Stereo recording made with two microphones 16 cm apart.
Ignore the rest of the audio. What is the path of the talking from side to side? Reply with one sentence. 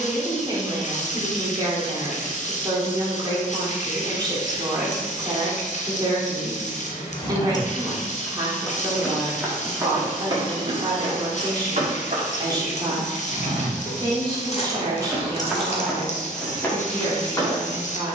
In this clip you hear the talking stay put.